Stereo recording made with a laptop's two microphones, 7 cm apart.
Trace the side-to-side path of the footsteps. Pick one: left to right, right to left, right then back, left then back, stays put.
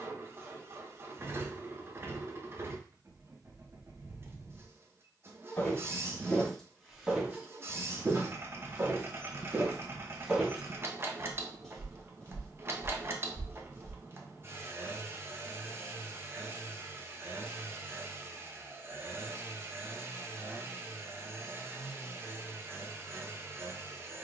right then back.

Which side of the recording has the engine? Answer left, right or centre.
right.